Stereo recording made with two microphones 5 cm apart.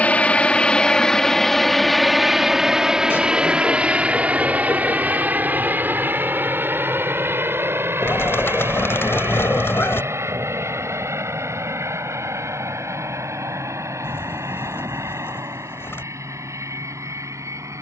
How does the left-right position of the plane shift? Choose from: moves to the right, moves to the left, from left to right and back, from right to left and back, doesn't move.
moves to the right.